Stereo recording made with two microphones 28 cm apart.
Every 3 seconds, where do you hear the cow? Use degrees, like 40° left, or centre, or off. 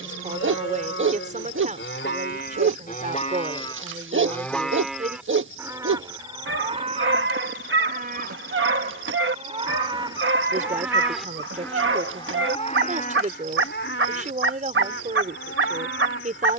40° left, 10° left, 30° right, 10° right, 30° left, 50° left.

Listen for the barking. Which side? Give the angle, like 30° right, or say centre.
50° right.